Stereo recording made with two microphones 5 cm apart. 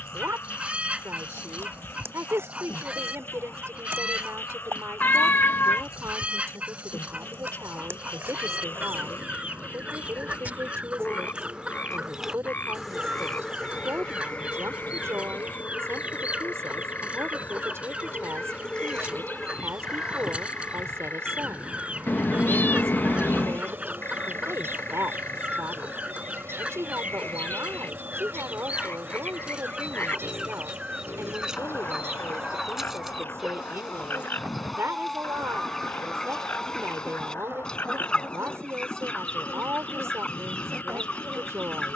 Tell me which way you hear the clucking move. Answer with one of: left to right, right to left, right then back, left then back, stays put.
right to left.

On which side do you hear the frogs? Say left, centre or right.
left.